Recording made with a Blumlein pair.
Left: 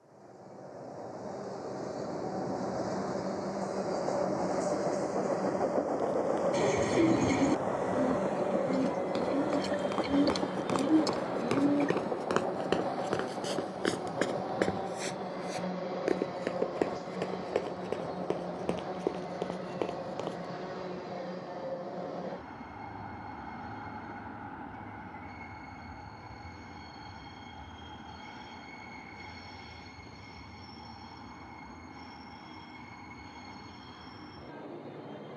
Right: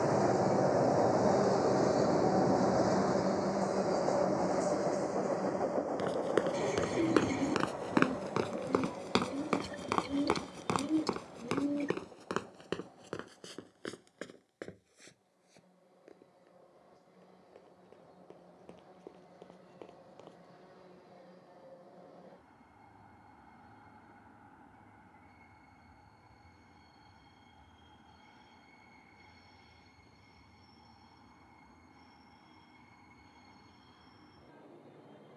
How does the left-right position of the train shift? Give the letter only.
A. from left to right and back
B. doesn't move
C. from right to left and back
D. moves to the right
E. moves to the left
E.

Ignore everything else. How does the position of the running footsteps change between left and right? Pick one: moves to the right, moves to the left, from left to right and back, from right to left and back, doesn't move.
moves to the left.